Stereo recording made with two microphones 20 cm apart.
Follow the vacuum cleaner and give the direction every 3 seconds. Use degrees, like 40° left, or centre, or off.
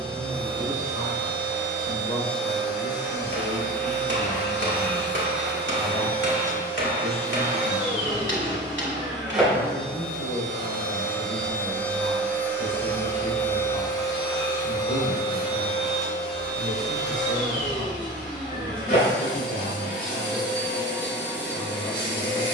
20° right, 10° right, 10° right, centre, 20° left, 40° left, 50° left, 60° left.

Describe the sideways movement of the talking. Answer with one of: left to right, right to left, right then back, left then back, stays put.
stays put.